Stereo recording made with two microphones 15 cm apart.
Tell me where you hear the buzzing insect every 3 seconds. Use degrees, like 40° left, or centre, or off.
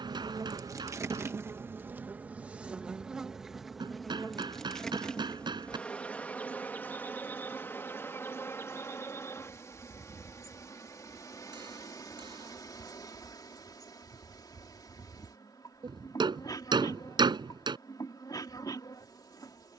20° right, centre, 10° left, 20° left, 30° left, 30° left, 30° left.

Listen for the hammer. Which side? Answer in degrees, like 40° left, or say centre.
30° right.